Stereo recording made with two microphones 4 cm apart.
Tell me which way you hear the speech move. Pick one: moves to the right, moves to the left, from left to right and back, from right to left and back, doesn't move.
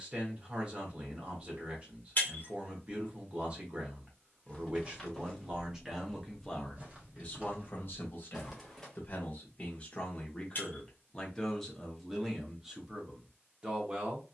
from right to left and back.